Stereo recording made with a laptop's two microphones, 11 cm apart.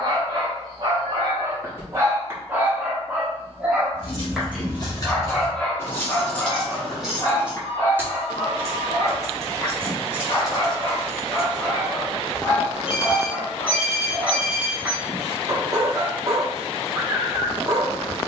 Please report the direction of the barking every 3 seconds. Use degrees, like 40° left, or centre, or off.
30° right, centre, 20° left, 30° left, 10° left, 30° right.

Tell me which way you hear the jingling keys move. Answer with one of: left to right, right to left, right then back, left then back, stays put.
right then back.